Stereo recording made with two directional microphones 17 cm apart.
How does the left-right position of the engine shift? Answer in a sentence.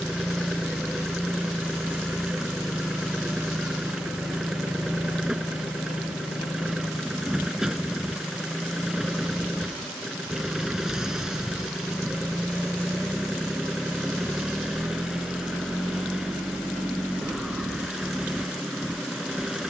In this clip you hear the engine stay in one place.